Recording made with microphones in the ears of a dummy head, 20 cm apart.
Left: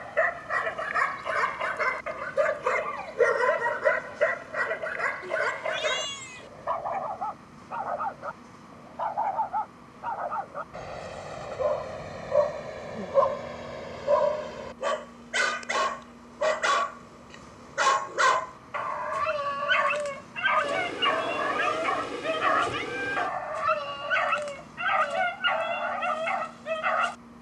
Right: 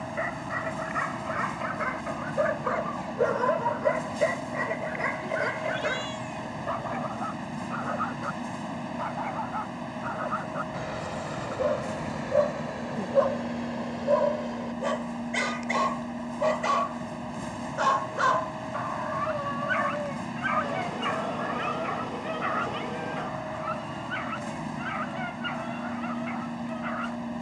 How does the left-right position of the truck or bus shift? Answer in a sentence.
You can hear the truck or bus stay put.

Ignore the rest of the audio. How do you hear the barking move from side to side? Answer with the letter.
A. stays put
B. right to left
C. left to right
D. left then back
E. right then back
E.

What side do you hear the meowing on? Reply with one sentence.
You can hear the meowing on the left.